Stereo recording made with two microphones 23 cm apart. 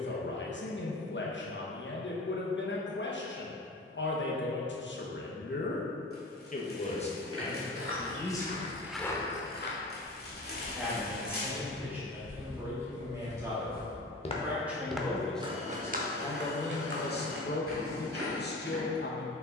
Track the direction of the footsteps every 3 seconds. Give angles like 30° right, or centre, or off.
off, off, 50° right, 50° left, 40° left, 50° right, 70° right.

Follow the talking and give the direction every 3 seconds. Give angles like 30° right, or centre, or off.
50° left, 50° left, 20° left, 10° right, 10° right, 30° left, 50° left.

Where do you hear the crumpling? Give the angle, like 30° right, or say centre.
40° left.